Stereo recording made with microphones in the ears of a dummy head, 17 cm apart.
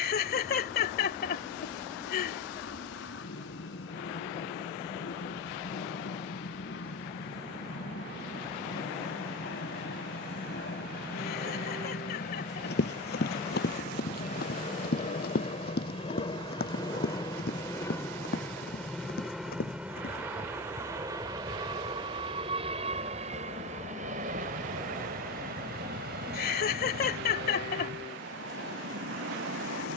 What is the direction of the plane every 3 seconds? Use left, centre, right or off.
left, left, left, left, left, left, centre, right, right, right.